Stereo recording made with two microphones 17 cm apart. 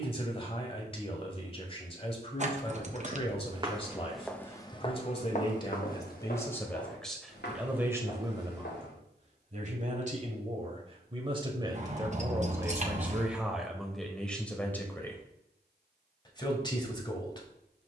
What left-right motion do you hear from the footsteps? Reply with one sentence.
In this clip you hear the footsteps move from right to left.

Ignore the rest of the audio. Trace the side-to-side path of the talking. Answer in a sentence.
You can hear the talking go right and come back.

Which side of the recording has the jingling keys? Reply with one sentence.
In this clip you hear the jingling keys on the right.